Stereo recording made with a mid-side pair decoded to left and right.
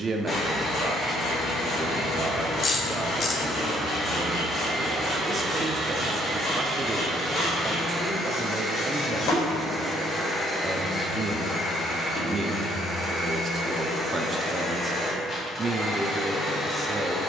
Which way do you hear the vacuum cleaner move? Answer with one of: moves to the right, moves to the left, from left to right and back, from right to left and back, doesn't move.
from left to right and back.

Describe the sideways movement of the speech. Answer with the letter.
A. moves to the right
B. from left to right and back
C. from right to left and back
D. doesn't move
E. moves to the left
D.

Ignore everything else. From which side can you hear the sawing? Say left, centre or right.
left.